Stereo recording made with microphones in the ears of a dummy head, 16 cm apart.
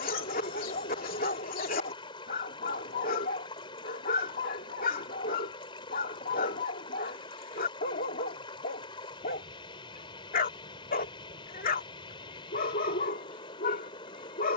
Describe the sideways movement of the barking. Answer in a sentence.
In this clip you hear the barking stay in one place.